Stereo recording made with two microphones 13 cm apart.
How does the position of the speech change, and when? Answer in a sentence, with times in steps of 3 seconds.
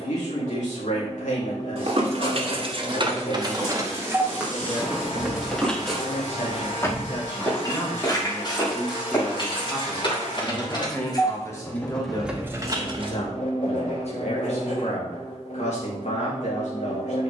You can hear the speech on the left from 0 s, in the centre from 9 s and on the left from 12 s.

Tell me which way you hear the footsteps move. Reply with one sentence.
You can hear the footsteps travel towards the left.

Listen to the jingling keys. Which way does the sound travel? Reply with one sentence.
In this clip you hear the jingling keys go left and come back.